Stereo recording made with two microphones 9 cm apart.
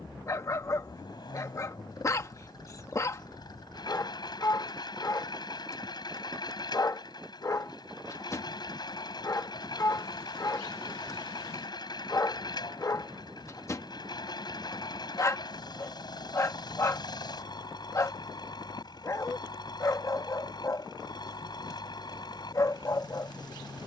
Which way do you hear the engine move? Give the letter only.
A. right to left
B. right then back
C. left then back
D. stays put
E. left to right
D.